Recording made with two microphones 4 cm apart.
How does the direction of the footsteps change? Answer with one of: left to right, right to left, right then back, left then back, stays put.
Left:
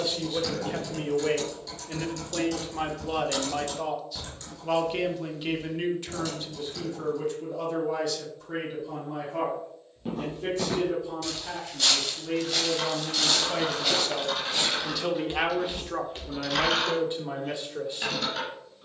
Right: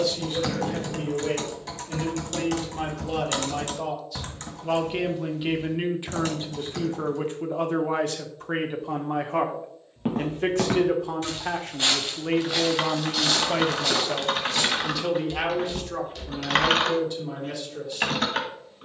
right to left.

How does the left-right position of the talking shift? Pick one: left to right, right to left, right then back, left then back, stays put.
right then back.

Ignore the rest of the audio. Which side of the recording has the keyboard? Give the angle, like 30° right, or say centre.
60° right.